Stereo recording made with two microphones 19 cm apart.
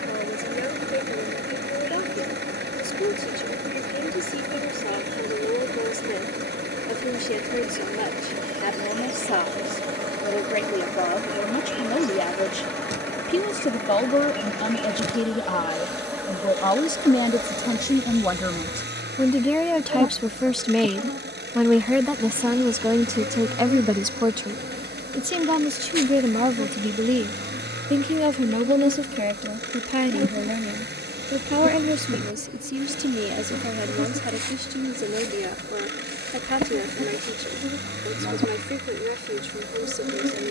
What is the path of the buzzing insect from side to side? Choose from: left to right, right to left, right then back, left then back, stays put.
left then back.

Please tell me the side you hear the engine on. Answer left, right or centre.
right.